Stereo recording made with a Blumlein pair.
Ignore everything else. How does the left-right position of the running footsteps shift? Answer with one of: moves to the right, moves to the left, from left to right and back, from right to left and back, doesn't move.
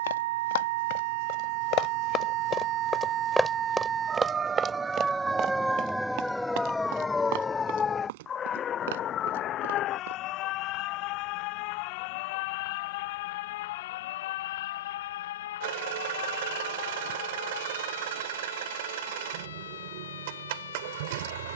moves to the right.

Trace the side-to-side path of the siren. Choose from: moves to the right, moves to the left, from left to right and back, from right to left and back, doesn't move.
moves to the left.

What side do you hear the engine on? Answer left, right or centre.
right.